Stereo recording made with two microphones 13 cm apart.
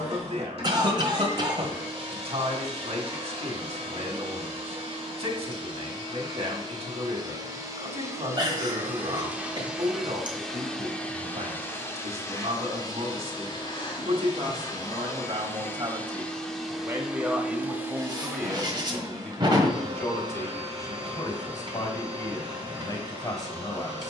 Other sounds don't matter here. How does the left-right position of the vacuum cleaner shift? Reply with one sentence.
You can hear the vacuum cleaner move from right to left and back again.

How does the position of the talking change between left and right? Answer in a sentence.
In this clip you hear the talking travel towards the left.